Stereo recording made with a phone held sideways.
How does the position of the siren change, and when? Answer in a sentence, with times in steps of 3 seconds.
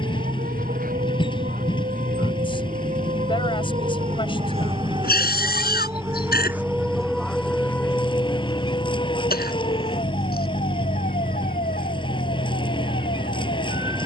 In this clip you hear the siren on the right from 0 s, in the centre from 6 s and on the left from 9 s.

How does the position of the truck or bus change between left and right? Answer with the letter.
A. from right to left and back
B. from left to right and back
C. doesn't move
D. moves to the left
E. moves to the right
C.